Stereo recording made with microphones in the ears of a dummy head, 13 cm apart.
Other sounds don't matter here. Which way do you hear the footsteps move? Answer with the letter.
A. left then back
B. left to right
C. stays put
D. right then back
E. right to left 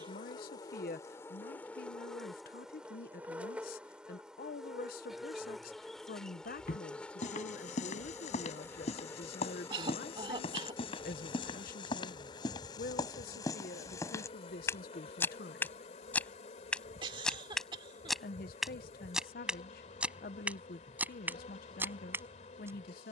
B.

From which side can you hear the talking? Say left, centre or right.
left.